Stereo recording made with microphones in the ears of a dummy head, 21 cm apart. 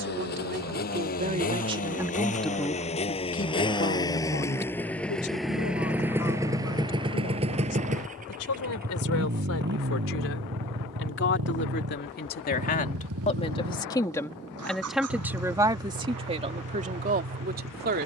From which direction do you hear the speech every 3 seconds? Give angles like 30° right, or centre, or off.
30° right, 50° left, 70° left, 60° left, 20° left, 30° right.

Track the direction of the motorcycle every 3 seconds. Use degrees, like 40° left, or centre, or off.
40° left, 10° left, 30° right, 50° right, 70° right, 80° right.